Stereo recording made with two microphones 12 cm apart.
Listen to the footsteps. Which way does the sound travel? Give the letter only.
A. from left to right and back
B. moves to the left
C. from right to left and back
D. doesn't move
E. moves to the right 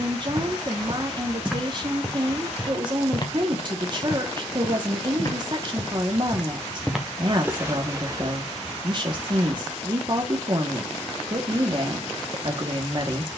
C.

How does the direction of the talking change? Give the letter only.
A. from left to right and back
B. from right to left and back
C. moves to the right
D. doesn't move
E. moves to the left
D.